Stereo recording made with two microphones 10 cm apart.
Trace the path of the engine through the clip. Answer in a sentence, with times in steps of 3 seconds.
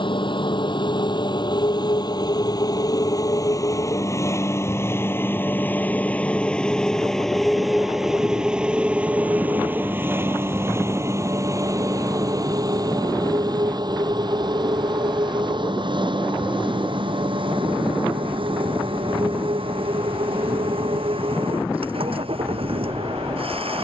In this clip you hear the engine on the left from 0 s, in the centre from 6 s and on the right from 9 s.